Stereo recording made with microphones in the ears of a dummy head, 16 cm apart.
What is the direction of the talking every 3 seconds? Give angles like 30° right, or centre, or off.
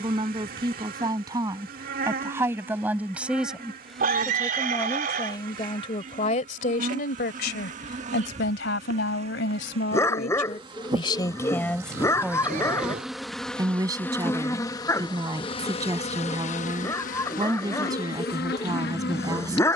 20° right, 10° left, 60° left, 40° left, 10° right, 20° right, 20° right.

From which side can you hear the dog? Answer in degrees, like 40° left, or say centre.
20° left.